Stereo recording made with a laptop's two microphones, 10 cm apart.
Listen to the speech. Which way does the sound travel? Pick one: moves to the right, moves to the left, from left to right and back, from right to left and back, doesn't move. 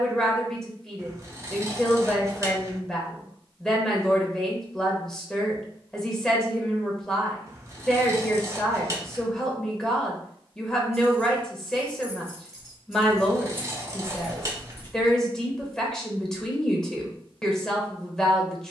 doesn't move.